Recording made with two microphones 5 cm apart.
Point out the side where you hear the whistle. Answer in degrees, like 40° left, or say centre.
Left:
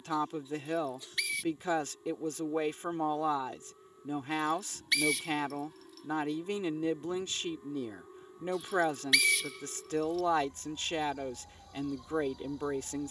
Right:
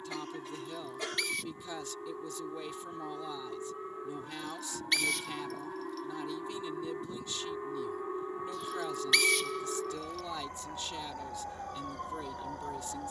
centre.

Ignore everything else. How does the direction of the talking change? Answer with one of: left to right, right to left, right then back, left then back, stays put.
stays put.